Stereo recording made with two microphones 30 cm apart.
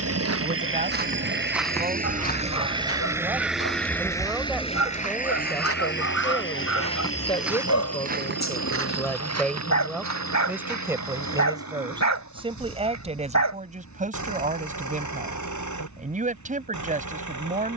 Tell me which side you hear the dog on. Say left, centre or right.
left.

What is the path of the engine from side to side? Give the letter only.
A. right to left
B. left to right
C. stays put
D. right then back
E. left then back
A.